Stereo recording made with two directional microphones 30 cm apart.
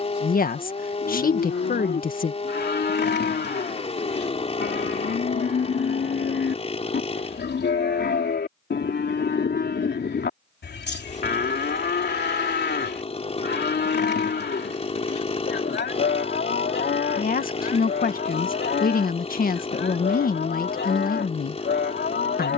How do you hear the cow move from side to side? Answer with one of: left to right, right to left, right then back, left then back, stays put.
stays put.